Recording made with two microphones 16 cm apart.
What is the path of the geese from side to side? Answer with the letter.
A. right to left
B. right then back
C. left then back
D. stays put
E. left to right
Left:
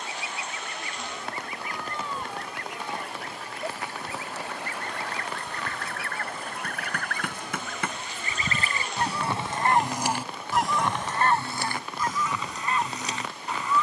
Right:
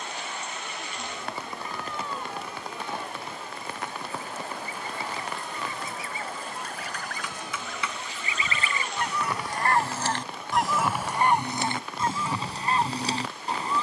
E.